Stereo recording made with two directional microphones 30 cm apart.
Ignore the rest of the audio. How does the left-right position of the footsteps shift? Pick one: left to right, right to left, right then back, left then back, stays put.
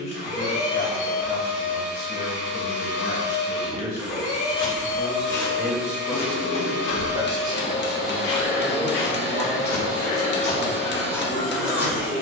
left then back.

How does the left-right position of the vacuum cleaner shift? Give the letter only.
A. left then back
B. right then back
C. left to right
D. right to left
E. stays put
E.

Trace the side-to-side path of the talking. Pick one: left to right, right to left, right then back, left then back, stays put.
left to right.